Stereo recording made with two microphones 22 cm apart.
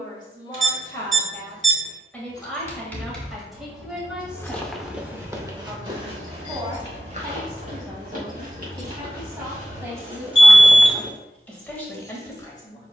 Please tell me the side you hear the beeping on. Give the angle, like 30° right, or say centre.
60° right.